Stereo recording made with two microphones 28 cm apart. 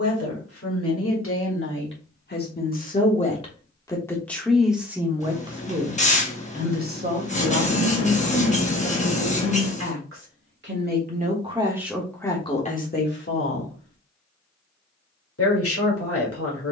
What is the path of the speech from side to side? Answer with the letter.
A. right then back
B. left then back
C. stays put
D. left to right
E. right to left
A.